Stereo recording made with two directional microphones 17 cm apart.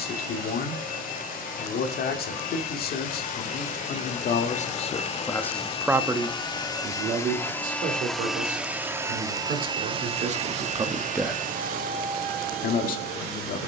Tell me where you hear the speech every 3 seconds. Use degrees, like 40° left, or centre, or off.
60° left, 40° left, 50° right, 40° right, 60° left.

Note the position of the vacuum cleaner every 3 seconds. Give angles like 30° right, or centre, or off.
60° left, 40° left, 10° left, 40° right, 60° right.